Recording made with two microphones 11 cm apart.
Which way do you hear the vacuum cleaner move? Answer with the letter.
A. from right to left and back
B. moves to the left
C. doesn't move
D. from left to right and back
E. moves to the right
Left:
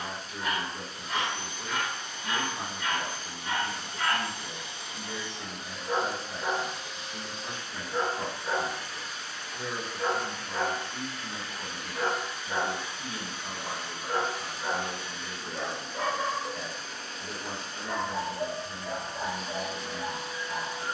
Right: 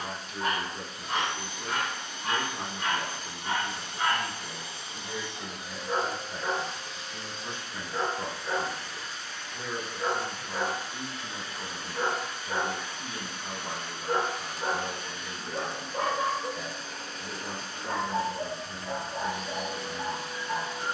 A.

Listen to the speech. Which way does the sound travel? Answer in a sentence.
In this clip you hear the speech stay in one place.